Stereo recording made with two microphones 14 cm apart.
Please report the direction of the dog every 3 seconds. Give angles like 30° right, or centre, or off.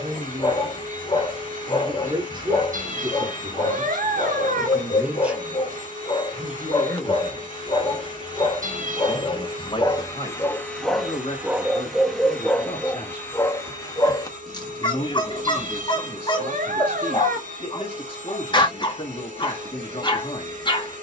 40° left, 40° left, 40° left, 10° left, 20° left, 30° left, 30° left.